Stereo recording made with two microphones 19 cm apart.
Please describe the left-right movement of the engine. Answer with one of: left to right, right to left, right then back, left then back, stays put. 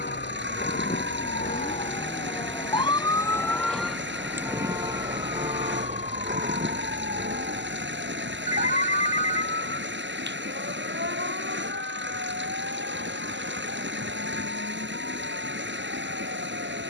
stays put.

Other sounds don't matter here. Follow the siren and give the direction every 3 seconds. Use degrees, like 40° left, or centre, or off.
50° left, 10° right, 50° right, 60° right, 70° right, 70° right.